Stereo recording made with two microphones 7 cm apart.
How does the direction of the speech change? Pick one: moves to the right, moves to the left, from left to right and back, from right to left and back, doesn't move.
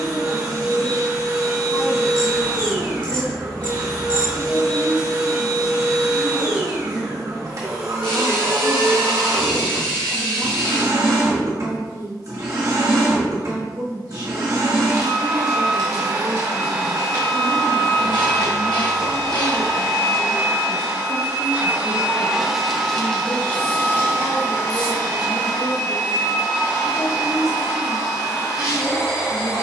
moves to the left.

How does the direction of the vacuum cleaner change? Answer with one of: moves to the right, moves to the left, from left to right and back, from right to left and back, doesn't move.
moves to the left.